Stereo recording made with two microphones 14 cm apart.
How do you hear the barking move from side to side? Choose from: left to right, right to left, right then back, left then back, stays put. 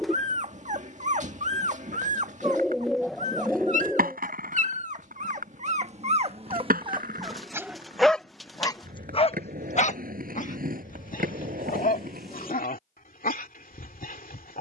right to left.